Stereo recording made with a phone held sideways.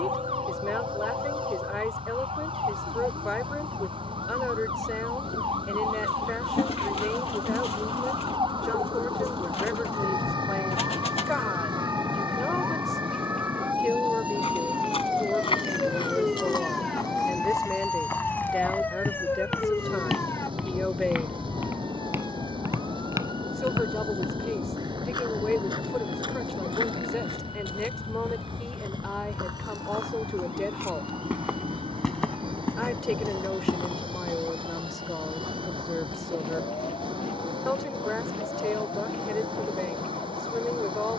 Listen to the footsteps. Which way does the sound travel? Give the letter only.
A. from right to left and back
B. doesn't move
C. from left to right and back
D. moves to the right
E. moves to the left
C.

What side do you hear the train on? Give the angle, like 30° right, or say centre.
40° right.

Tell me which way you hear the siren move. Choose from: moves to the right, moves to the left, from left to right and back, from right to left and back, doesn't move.
moves to the left.